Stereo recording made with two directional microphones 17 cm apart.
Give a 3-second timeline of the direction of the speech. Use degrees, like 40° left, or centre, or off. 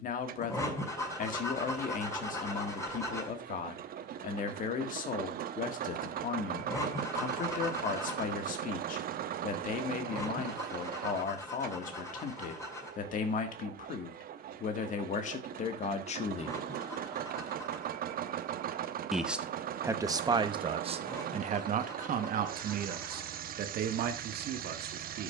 50° left, 50° left, 50° left, 50° left, 50° left, 40° left, 20° right, 50° right, 70° right.